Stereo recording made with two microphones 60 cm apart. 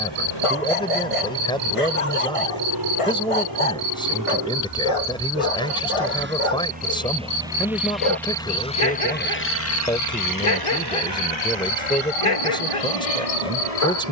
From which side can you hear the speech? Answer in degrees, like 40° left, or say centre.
10° left.